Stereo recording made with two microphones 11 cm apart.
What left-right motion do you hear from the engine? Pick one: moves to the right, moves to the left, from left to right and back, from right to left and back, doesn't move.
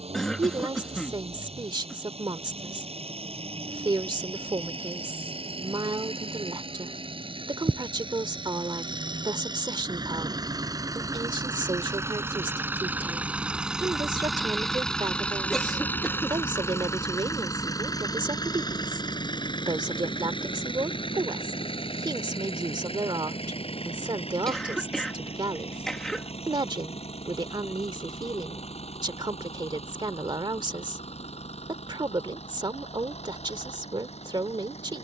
moves to the left.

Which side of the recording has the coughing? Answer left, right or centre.
centre.